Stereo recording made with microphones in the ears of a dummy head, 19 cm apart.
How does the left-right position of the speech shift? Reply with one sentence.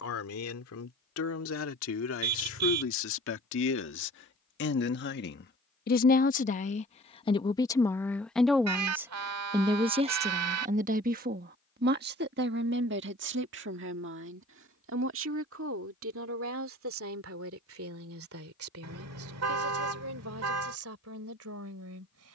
You can hear the speech go from the left side to the right.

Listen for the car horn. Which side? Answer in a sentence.
In this clip you hear the car horn on the right.